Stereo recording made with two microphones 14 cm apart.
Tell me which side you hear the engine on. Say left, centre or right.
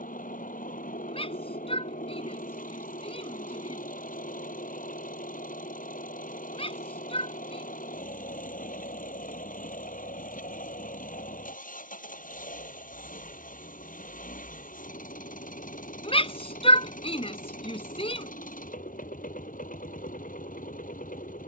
left.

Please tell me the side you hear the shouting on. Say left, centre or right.
left.